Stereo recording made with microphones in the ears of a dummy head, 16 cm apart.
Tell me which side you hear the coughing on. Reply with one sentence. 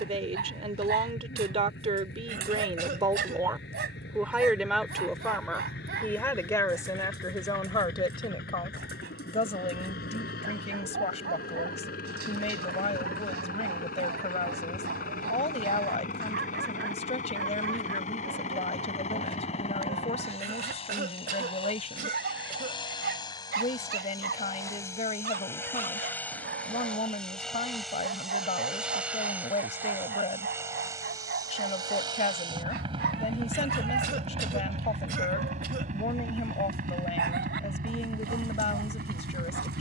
In this clip you hear the coughing on the right.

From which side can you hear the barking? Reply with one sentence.
In this clip you hear the barking on the right.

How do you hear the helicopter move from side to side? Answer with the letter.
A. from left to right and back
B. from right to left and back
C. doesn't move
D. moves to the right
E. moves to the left
D.